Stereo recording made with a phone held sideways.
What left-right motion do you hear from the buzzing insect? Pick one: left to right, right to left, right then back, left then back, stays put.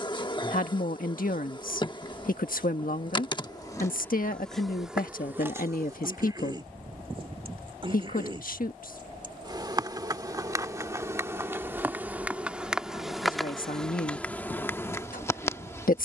right then back.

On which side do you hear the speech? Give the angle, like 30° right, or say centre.
70° left.